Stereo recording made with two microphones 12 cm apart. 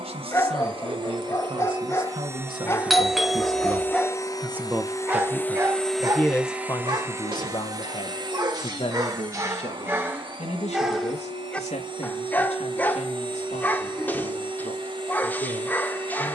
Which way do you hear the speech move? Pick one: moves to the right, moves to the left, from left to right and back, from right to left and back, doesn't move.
moves to the left.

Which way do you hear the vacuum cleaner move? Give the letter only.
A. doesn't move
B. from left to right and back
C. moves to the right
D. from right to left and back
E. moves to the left
D.